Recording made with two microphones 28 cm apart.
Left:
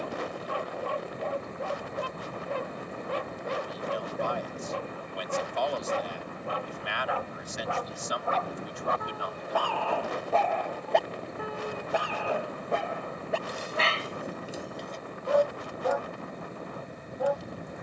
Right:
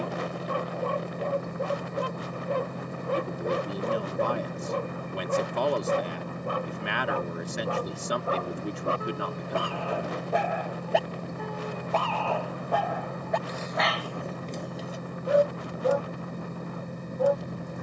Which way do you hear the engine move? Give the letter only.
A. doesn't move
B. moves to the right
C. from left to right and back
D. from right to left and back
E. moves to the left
A.